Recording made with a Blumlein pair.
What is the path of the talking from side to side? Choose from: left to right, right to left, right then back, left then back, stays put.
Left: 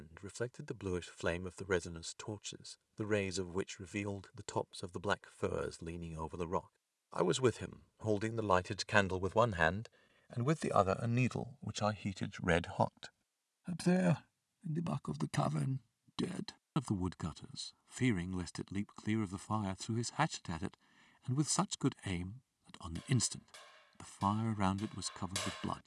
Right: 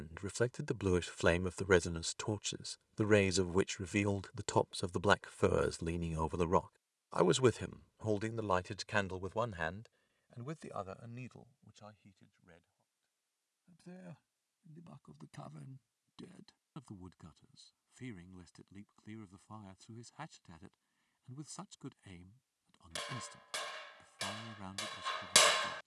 right to left.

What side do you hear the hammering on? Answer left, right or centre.
right.